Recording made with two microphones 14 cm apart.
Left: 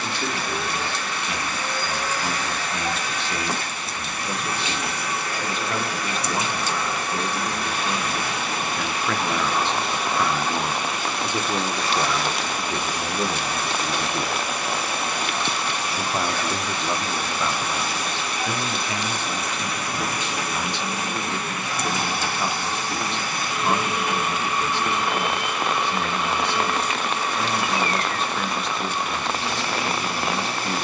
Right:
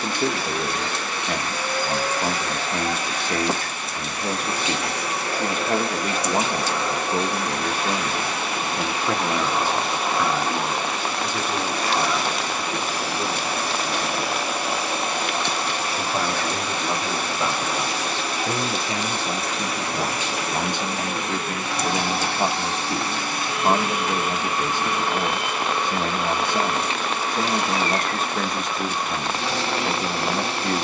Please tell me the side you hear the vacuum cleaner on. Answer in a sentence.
In this clip you hear the vacuum cleaner on the right.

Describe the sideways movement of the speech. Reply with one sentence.
You can hear the speech go left and come back.